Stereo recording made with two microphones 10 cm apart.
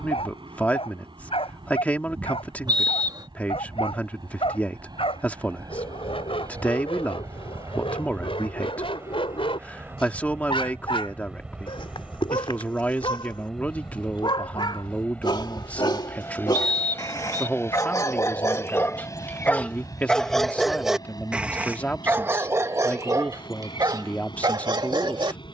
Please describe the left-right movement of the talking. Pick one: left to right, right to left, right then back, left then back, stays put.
stays put.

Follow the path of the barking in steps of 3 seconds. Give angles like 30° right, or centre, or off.
80° left, 70° left, 70° left, 70° left, 60° left, 50° left, 20° left, 30° right, 50° right.